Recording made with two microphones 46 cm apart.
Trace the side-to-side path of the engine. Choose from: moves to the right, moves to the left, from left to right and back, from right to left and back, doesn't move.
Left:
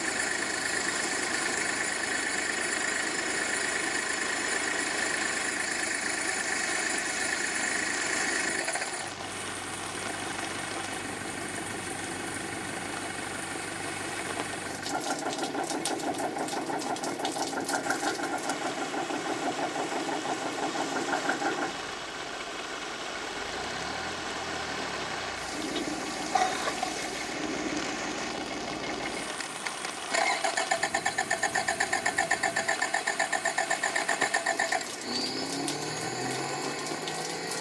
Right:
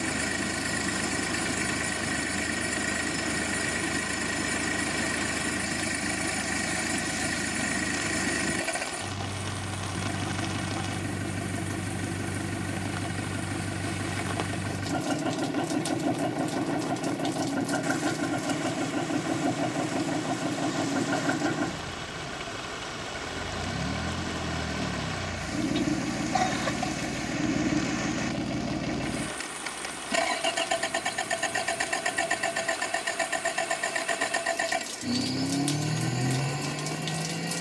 doesn't move.